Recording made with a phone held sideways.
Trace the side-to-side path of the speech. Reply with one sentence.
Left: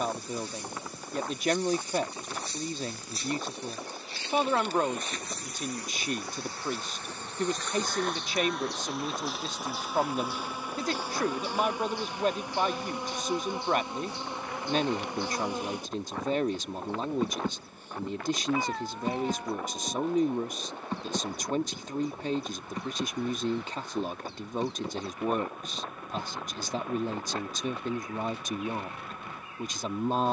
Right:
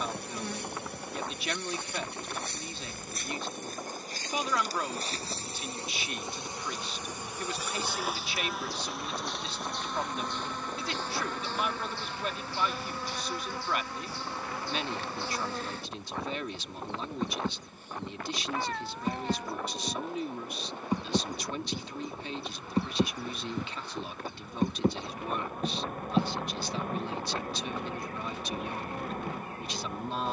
You can hear the speech stay in one place.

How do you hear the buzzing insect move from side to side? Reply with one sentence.
In this clip you hear the buzzing insect move from right to left and back again.